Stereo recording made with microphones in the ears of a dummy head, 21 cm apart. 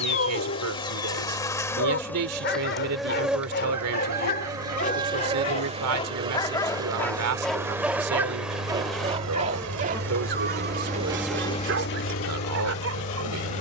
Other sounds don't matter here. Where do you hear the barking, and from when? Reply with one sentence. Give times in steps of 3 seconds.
You can hear the barking on the left from 0 s, in the centre from 6 s and on the right from 9 s.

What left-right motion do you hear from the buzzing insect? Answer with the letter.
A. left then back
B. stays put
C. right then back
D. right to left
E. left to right
C.